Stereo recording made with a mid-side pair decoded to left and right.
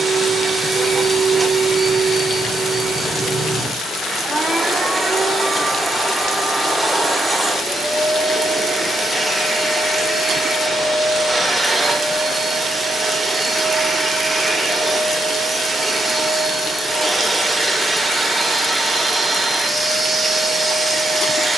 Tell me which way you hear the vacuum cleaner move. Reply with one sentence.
You can hear the vacuum cleaner stay in one place.